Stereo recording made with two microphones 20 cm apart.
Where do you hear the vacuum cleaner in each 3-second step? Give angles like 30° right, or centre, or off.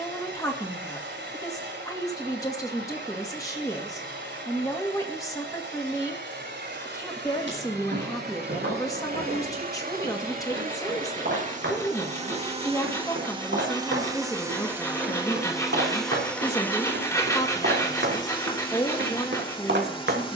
70° right, 70° right, 60° right, 50° right, 20° right, 10° left, 30° left.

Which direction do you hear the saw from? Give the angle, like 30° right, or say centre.
20° left.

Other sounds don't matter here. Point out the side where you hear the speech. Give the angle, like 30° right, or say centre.
20° left.